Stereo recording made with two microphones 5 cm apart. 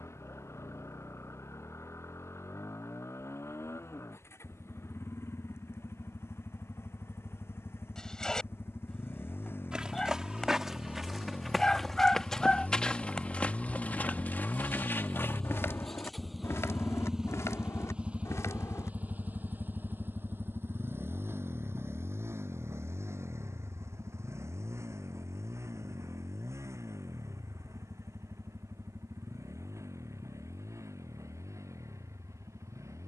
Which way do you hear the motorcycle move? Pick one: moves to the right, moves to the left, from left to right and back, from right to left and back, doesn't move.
moves to the right.